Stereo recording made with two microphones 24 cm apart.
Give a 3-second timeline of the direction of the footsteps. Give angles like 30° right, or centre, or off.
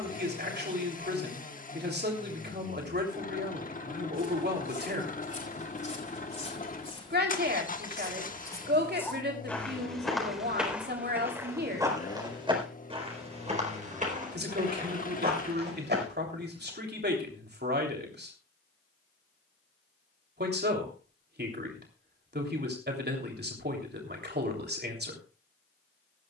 off, 30° left, 20° left, centre, 30° right, 40° right, off, off, off.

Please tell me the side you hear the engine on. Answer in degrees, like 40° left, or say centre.
30° left.